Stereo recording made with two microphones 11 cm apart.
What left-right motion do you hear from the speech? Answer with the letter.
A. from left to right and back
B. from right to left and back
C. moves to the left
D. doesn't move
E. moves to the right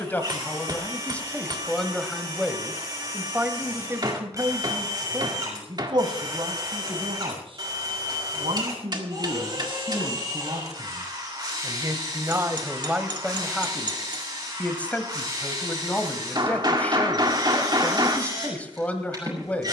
A.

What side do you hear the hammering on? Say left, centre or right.
right.